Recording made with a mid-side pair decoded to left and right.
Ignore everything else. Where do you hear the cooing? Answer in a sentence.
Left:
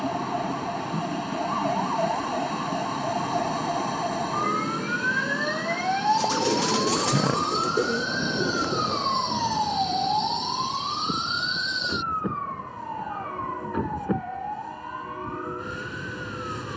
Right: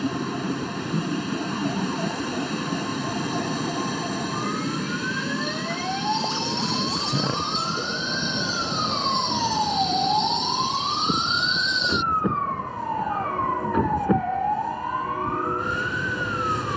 You can hear the cooing on the left.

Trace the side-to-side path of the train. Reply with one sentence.
You can hear the train stay put.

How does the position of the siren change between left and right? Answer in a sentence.
You can hear the siren travel towards the right.